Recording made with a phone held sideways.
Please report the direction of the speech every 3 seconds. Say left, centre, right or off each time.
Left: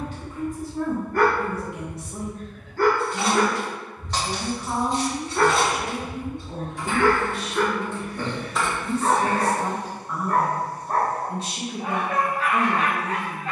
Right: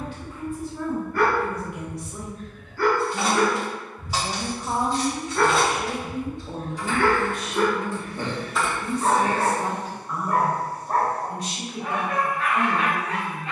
left, right, right, centre, left.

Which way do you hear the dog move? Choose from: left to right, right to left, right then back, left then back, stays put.
right then back.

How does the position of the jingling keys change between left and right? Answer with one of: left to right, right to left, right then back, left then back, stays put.
left then back.